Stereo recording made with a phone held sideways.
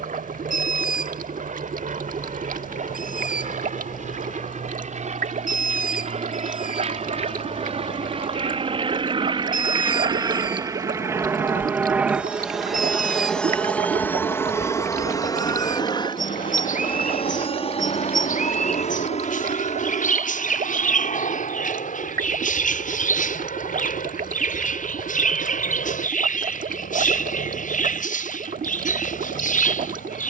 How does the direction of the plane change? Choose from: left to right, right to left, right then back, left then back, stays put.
right to left.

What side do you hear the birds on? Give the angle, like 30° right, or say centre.
70° left.